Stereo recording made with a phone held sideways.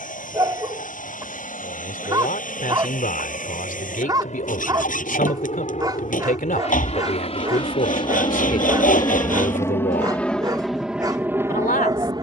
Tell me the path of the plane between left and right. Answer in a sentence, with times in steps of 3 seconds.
In this clip you hear the plane on the left from 0 s and in the centre from 9 s.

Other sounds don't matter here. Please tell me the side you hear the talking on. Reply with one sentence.
In this clip you hear the talking on the left.